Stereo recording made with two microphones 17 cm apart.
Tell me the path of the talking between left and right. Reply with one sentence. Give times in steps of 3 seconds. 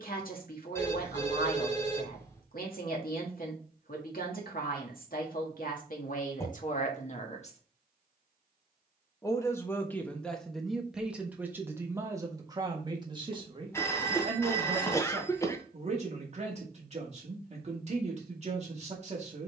In this clip you hear the talking on the left from 0 s, in the centre from 9 s and on the right from 12 s.